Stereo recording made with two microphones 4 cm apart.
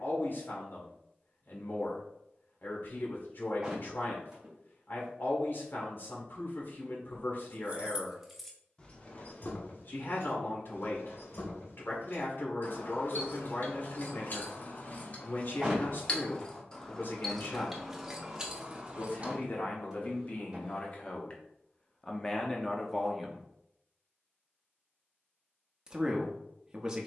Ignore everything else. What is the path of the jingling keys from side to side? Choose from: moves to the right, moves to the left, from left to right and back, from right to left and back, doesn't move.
from right to left and back.